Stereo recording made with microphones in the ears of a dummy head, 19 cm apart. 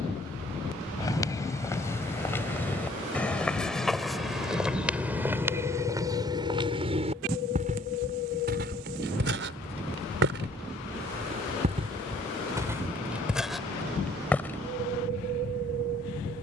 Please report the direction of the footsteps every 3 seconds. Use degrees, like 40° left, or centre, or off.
10° left, centre, 40° right, 50° right, centre, off.